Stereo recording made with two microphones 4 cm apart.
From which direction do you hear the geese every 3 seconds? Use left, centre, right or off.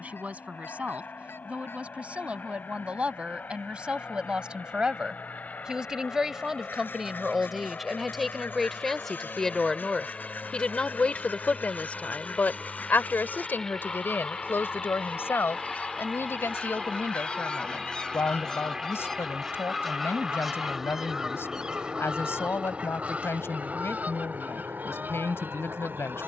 left, left, left, left, left, left, centre, right, right.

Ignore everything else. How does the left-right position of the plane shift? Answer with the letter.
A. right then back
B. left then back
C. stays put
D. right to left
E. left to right
E.